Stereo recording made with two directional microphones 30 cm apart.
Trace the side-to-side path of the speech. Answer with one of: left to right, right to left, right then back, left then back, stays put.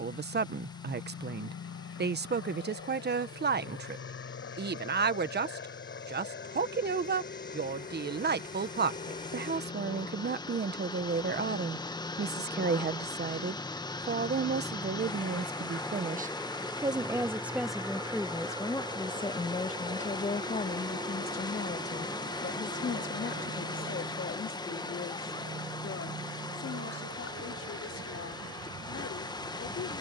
right to left.